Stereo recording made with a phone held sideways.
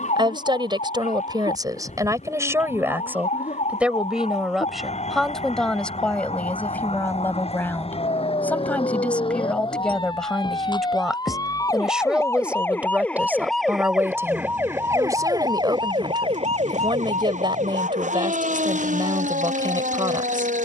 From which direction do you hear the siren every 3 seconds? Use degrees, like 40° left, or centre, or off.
60° left, 60° left, 50° left, 30° left, centre, 40° right, 70° right.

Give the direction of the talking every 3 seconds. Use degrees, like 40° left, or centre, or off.
30° right, centre, 10° left, centre, 10° right, 30° right, 30° right.